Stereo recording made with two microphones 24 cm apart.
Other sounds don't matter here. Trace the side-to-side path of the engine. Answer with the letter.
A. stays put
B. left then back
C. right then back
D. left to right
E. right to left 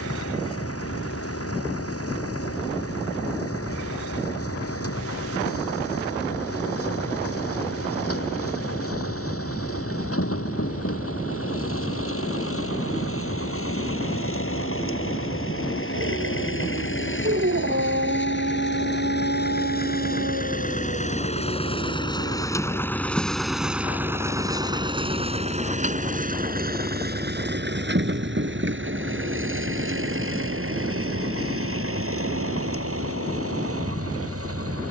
D.